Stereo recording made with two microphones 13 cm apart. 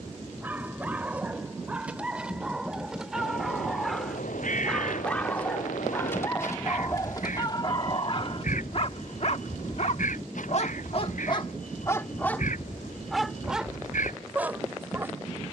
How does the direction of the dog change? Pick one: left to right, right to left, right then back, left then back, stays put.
left then back.